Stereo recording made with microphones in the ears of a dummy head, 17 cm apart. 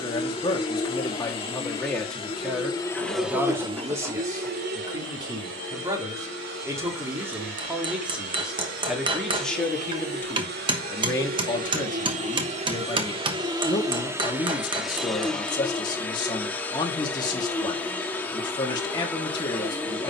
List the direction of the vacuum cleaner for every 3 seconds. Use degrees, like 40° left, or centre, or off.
30° left, 40° right, 70° right, 50° right, 20° right, 10° left, 10° left.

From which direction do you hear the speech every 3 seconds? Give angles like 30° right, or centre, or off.
10° left, 20° right, 10° right, 10° left, 20° left, 20° left, 20° left.